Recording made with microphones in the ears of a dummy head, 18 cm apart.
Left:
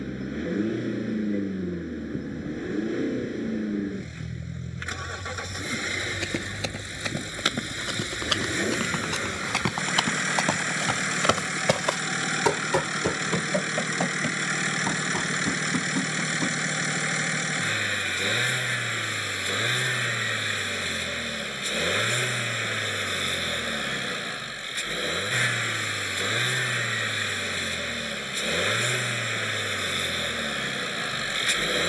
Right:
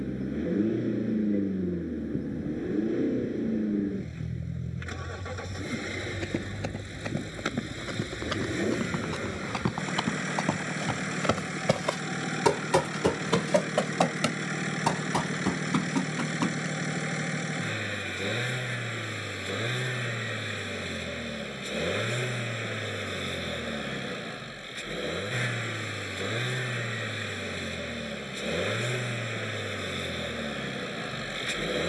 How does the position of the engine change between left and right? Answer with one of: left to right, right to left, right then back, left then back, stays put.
stays put.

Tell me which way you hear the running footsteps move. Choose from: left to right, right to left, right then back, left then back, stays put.
left to right.